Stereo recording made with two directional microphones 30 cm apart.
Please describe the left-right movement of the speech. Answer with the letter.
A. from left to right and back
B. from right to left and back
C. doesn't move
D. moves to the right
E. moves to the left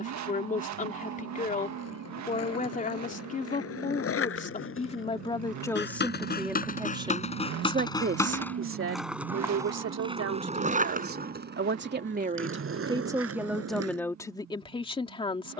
A.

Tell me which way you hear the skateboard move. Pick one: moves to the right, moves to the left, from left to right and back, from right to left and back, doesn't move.
moves to the right.